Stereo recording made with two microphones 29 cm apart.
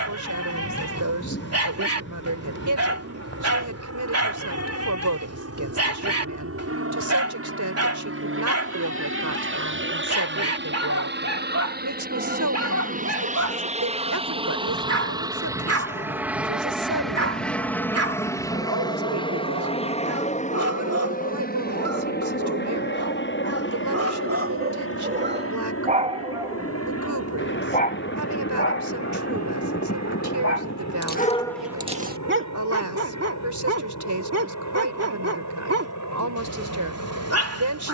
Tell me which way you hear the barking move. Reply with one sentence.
In this clip you hear the barking move from right to left and back again.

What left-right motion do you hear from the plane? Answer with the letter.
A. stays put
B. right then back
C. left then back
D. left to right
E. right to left
E.